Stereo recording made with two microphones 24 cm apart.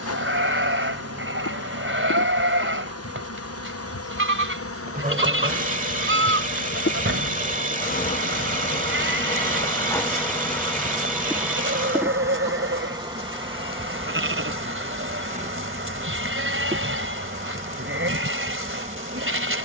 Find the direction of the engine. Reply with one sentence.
In this clip you hear the engine on the right.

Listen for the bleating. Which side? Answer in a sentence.
In this clip you hear the bleating on the right.